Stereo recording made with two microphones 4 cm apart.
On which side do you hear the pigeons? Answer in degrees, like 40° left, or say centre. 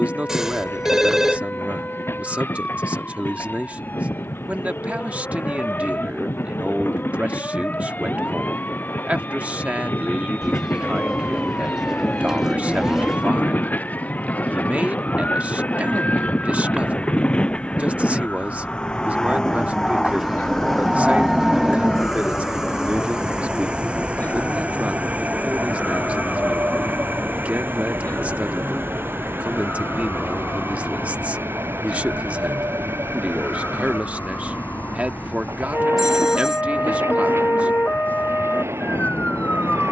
10° right.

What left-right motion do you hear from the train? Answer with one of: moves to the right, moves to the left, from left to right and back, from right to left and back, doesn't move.
moves to the right.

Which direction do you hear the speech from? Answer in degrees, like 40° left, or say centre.
30° right.